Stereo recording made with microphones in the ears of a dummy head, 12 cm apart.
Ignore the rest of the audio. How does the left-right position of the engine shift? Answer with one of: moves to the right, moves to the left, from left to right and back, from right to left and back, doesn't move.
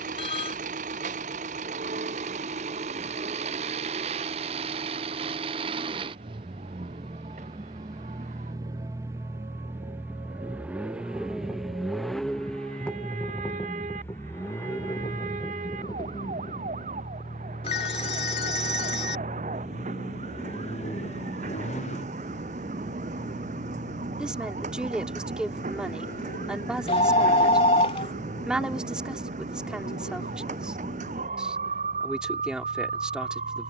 moves to the left.